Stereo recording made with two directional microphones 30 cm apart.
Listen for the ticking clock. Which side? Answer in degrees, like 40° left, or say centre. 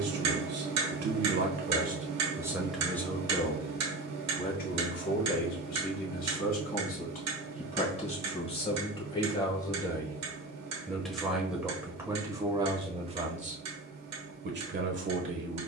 60° right.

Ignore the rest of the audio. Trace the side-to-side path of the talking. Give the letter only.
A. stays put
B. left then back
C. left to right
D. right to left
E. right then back
B.